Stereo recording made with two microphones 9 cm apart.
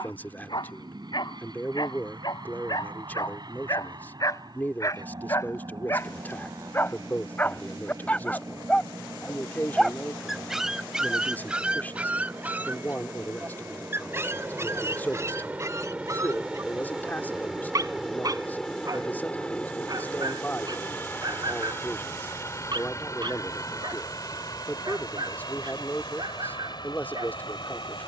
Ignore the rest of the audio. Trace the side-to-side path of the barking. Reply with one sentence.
In this clip you hear the barking move to the right.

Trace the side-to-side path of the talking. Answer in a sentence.
You can hear the talking stay in one place.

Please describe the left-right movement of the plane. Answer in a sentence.
In this clip you hear the plane move from right to left.